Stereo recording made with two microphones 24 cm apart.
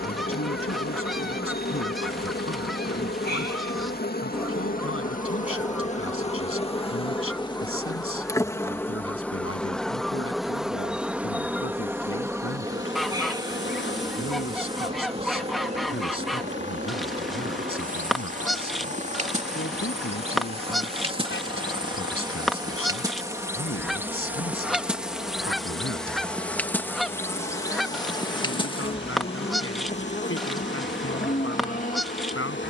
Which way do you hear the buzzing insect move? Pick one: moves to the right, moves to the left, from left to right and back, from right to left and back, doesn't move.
from left to right and back.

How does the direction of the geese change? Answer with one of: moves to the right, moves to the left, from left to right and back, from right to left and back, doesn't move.
doesn't move.